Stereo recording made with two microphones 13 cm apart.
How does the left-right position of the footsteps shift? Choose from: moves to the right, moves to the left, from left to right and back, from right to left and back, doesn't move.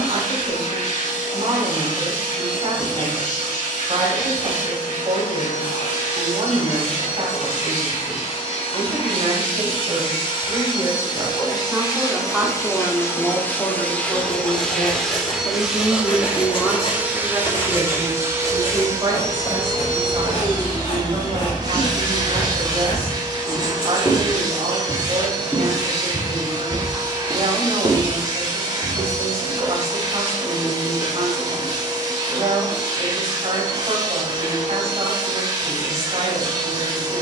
moves to the right.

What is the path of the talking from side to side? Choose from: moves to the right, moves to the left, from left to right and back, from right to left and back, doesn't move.
from right to left and back.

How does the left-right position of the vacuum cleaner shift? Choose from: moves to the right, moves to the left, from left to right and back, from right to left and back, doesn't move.
moves to the right.